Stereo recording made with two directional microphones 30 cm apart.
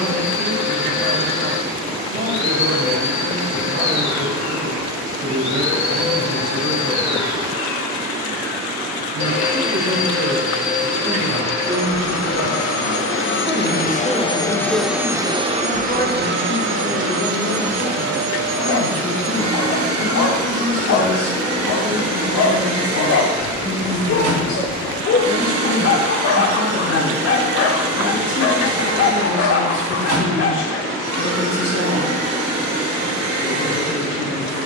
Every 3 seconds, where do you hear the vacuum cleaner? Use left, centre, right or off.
left, left, left, left, left, right, right, right, right, right, right, right.